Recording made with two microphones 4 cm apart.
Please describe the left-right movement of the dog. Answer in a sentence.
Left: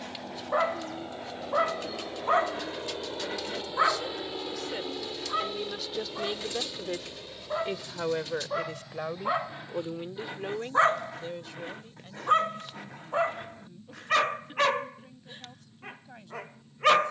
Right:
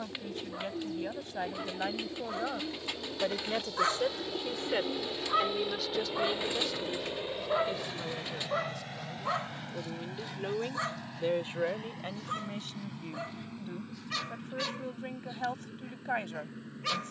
You can hear the dog move from left to right and back again.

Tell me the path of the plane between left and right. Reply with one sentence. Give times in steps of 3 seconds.
In this clip you hear the plane on the left from 0 s, in the centre from 3 s and on the right from 6 s.